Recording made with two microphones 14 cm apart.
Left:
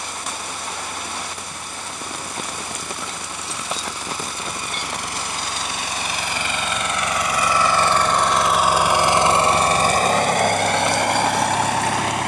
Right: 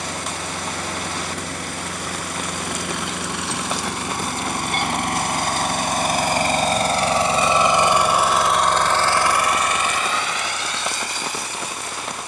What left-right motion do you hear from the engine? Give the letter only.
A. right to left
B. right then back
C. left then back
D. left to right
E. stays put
A.